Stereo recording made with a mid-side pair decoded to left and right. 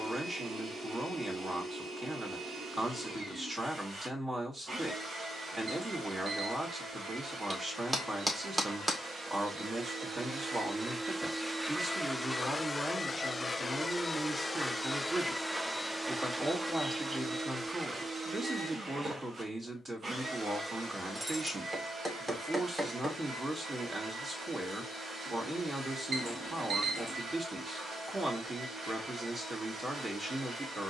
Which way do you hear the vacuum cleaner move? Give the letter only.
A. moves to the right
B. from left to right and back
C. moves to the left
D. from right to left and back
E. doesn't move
D.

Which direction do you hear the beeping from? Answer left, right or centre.
right.